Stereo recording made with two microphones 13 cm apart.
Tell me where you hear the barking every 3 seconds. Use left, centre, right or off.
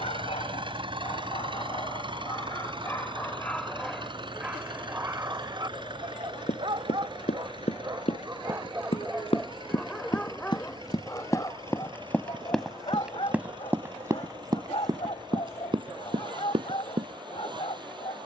left, centre, right, centre, left, left.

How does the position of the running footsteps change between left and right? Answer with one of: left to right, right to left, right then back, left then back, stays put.
left to right.